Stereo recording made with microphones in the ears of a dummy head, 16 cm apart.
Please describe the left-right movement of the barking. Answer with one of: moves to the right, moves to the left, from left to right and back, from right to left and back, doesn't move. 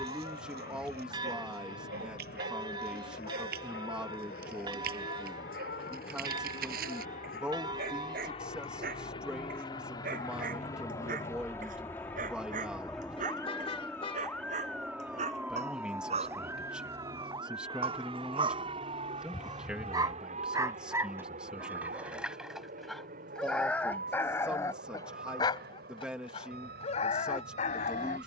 moves to the left.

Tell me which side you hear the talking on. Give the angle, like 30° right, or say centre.
10° right.